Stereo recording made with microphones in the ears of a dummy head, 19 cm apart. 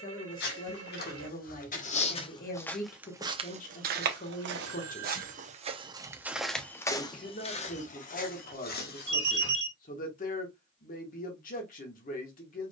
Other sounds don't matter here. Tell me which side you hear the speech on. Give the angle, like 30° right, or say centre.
40° left.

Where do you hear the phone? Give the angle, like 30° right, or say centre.
60° right.